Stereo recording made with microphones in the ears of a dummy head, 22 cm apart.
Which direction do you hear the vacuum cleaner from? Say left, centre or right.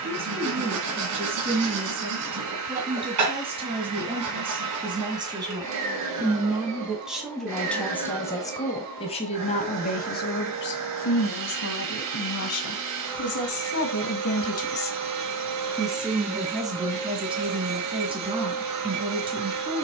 right.